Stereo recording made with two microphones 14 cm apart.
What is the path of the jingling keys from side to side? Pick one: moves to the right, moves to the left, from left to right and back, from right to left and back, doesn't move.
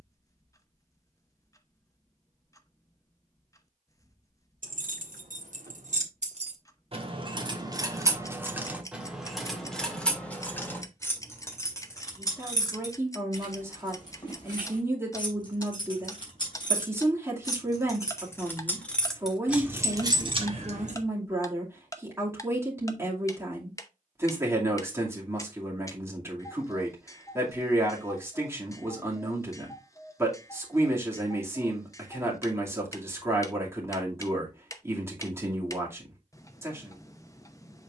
from right to left and back.